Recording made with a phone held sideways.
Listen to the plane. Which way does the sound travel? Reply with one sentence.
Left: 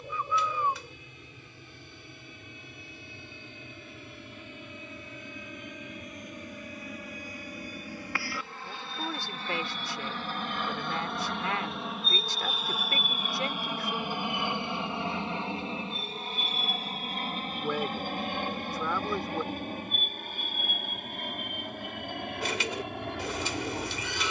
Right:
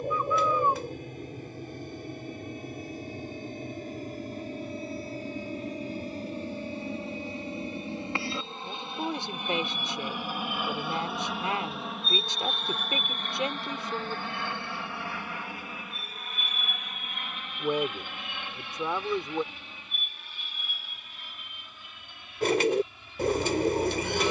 In this clip you hear the plane move to the left.